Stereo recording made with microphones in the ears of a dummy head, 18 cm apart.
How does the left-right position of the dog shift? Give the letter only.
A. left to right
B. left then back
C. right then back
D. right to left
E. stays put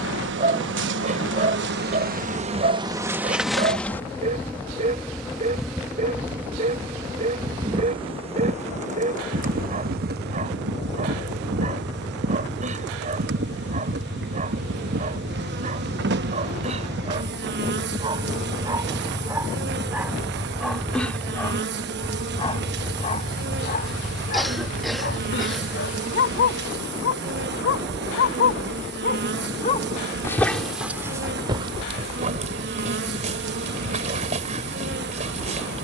B.